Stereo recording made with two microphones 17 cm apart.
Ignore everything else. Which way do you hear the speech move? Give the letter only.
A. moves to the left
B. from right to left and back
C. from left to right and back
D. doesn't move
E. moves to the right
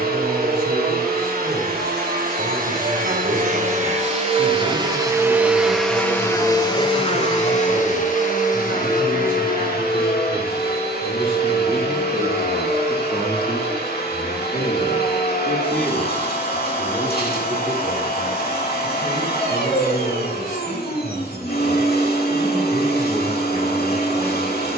B.